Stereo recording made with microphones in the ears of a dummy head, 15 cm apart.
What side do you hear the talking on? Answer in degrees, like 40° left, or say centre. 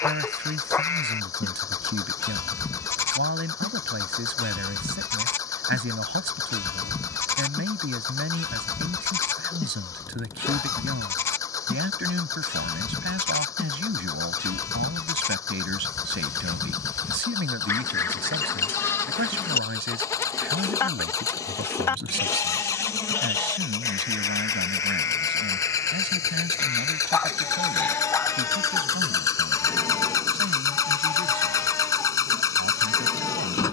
80° right.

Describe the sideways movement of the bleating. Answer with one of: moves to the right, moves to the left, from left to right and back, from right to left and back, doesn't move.
doesn't move.